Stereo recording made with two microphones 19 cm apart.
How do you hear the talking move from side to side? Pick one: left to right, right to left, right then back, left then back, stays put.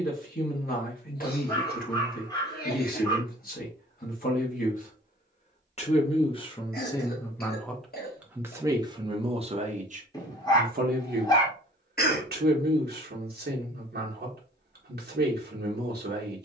left to right.